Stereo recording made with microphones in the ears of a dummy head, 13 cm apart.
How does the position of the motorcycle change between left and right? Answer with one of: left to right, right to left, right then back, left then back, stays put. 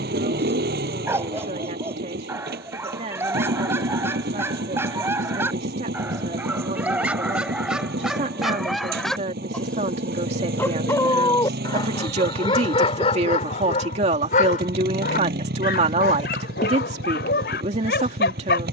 stays put.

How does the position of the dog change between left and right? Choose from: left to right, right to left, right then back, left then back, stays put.
right to left.